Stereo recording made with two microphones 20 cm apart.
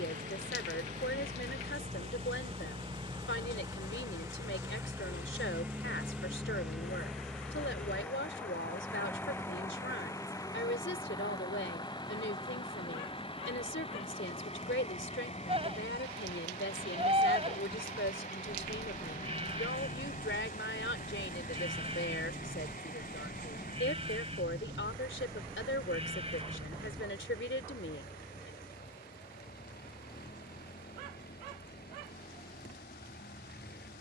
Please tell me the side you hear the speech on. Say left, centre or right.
left.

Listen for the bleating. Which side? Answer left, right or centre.
right.